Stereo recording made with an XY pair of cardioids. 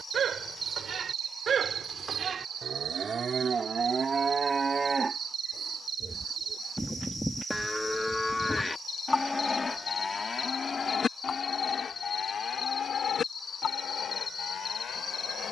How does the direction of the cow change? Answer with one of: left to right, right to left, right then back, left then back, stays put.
right to left.